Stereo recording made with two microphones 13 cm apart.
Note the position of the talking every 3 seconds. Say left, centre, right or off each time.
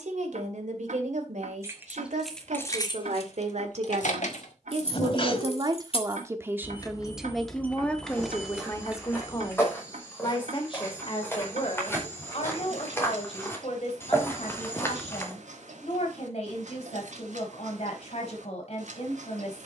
right, right, centre, left, left, left, left.